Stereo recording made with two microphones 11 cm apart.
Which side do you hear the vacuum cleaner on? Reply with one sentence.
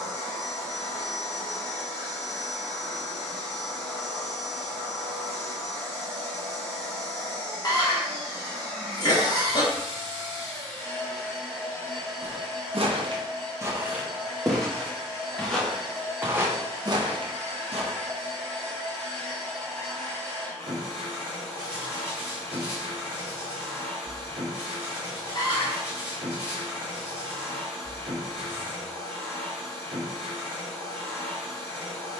In this clip you hear the vacuum cleaner on the right.